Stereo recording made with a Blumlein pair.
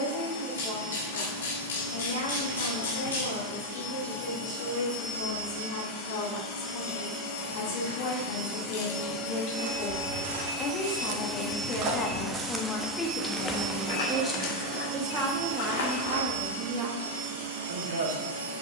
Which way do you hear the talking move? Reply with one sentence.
In this clip you hear the talking move to the right.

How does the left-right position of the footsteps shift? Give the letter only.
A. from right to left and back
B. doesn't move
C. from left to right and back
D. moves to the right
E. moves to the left
E.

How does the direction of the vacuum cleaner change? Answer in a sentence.
You can hear the vacuum cleaner move to the right.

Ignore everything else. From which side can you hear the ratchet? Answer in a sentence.
In this clip you hear the ratchet on the left.